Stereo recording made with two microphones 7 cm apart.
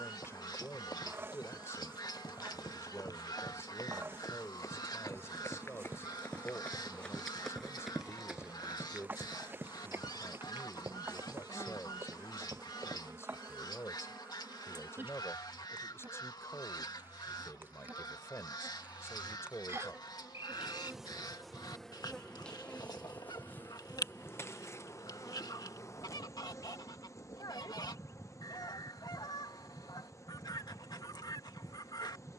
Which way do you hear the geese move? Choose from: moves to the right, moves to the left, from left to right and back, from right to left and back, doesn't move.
doesn't move.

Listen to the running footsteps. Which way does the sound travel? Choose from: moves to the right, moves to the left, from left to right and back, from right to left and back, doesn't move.
moves to the right.